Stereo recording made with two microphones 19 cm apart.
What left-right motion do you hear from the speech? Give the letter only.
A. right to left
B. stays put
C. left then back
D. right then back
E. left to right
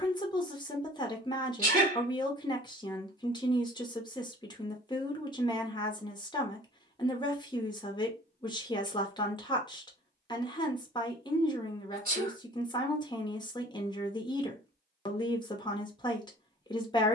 B.